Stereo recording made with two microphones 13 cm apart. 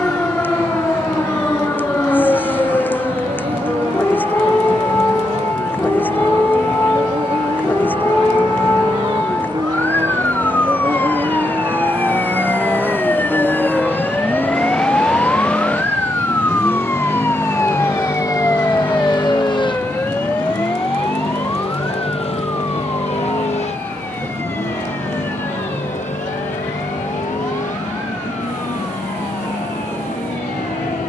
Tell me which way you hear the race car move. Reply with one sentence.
In this clip you hear the race car travel towards the left.